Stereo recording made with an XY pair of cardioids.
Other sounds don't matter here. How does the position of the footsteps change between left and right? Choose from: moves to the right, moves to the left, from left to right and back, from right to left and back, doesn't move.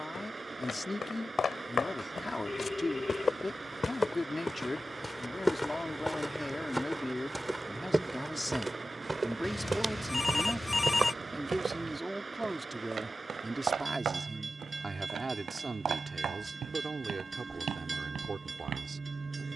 moves to the right.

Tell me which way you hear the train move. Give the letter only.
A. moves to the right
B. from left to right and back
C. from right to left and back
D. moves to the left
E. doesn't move
E.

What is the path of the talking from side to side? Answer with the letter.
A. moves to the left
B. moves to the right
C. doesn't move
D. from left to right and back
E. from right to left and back
B.